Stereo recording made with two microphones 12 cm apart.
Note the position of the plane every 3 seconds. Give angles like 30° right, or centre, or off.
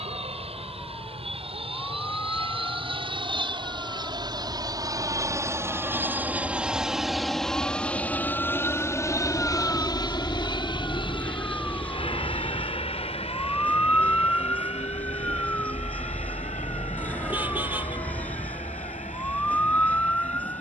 60° right, 40° right, centre, 40° left, 50° left, 60° left, 70° left.